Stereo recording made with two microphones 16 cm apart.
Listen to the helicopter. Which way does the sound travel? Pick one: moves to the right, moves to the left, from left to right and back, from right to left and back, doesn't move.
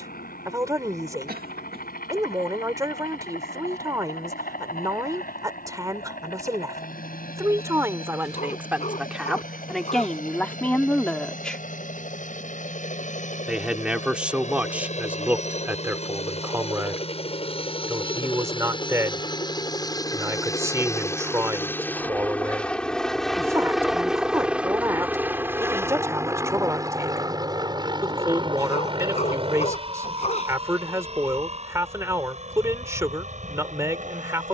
moves to the right.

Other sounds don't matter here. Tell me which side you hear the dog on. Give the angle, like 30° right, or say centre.
50° left.